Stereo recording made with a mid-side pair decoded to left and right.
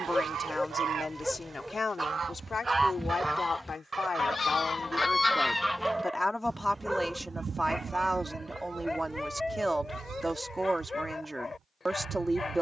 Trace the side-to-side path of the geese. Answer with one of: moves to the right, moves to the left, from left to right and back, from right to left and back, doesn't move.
from right to left and back.